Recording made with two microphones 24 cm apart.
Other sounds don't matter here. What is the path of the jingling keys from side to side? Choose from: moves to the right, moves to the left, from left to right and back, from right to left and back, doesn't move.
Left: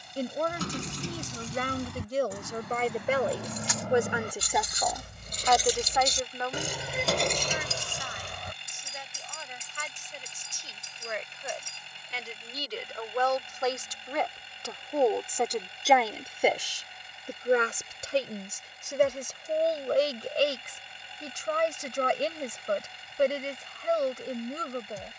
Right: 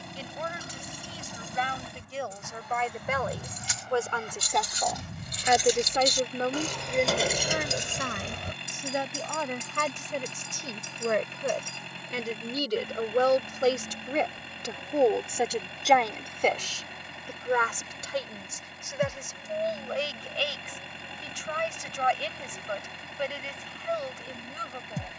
moves to the right.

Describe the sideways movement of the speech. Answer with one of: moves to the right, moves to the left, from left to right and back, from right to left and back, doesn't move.
from left to right and back.